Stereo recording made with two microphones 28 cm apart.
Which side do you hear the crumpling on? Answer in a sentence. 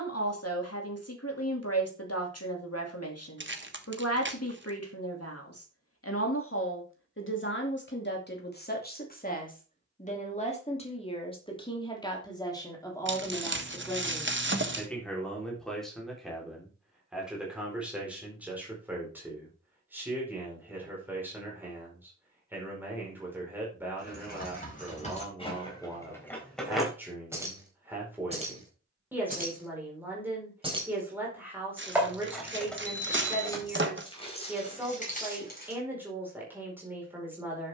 In this clip you hear the crumpling on the right.